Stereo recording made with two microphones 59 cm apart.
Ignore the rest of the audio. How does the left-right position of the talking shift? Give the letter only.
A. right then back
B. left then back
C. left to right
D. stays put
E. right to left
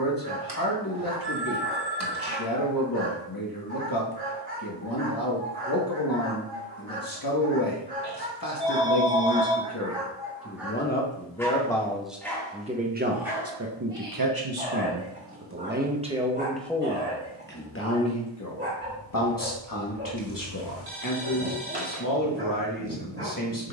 A.